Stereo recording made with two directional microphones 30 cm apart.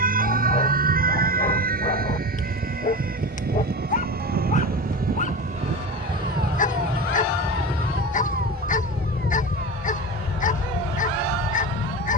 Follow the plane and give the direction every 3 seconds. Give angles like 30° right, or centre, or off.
50° right, 30° right, centre, 30° left.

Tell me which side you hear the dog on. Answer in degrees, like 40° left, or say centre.
30° left.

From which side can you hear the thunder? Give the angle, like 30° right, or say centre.
60° right.